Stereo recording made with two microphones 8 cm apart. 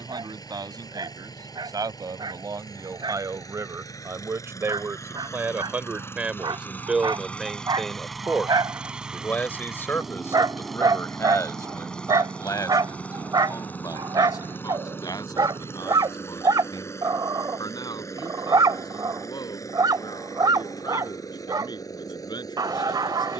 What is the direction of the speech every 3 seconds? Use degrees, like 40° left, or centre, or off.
60° right, 30° right, centre, 30° left, 50° left, 60° left, 70° left, 70° left.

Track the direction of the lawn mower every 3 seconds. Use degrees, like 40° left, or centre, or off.
60° left, 50° left, 10° left, centre, 20° left, 40° left, 50° left, 50° left.